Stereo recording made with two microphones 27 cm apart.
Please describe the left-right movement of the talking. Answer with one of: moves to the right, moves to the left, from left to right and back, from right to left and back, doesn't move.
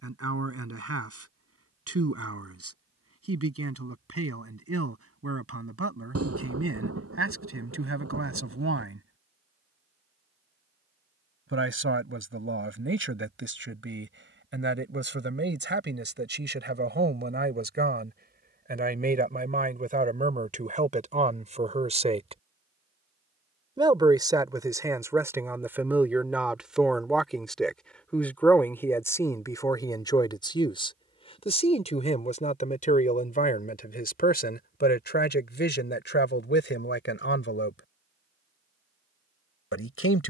moves to the left.